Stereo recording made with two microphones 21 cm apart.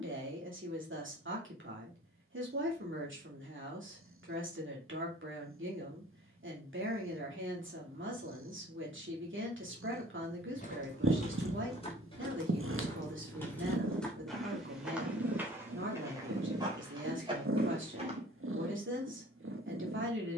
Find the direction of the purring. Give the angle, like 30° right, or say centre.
80° right.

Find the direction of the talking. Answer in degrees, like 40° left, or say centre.
70° right.